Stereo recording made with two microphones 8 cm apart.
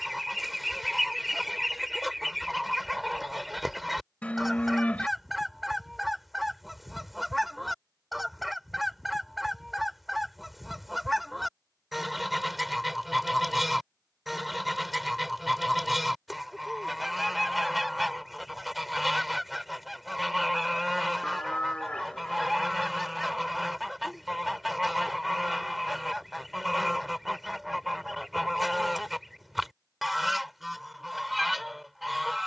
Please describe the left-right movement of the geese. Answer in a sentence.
You can hear the geese stay put.